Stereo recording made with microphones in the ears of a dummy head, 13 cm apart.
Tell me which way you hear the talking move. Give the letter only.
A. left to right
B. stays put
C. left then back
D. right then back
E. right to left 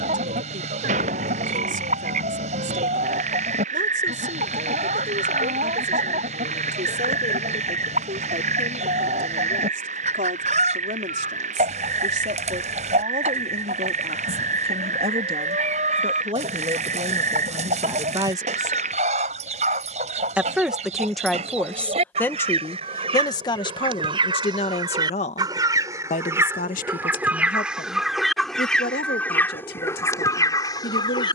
E.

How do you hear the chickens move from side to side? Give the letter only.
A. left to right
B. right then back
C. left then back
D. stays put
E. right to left
E.